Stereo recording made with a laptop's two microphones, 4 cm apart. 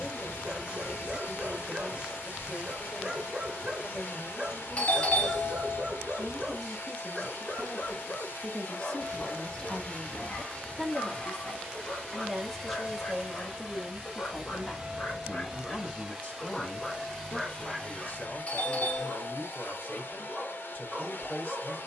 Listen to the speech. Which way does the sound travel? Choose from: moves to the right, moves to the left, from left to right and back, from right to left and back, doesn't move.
from left to right and back.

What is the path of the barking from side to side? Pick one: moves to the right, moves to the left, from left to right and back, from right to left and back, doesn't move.
from right to left and back.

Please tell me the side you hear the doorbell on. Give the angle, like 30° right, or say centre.
30° left.